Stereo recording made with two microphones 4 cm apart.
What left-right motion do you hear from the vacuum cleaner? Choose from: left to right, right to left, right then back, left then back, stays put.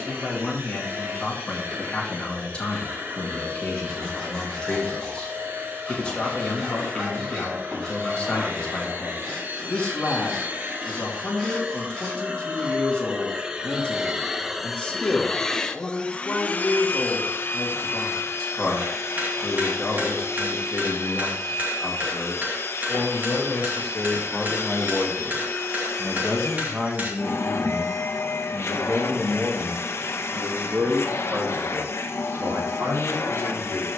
right to left.